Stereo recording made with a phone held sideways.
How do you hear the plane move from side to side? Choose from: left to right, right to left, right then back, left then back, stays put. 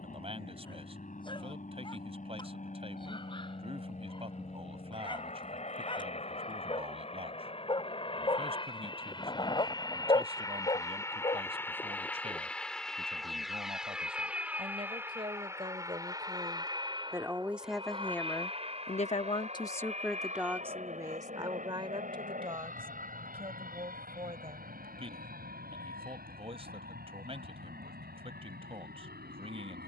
left to right.